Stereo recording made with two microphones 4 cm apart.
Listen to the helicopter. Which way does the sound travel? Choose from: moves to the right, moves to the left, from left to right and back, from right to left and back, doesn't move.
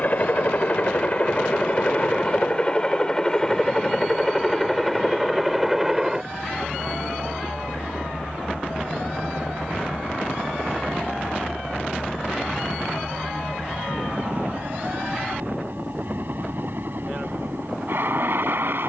moves to the right.